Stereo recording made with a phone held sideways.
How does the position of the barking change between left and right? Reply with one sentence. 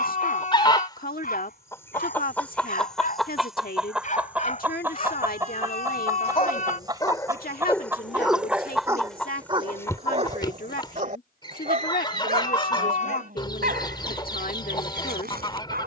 You can hear the barking move from left to right.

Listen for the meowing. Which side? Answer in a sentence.
You can hear the meowing on the left.